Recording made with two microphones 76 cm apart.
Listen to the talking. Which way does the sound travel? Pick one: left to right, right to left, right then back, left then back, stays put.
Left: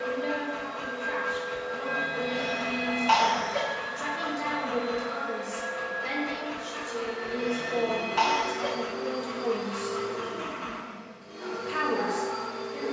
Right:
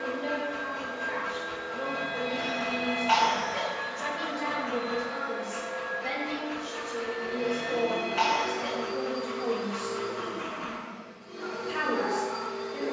stays put.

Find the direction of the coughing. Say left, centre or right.
left.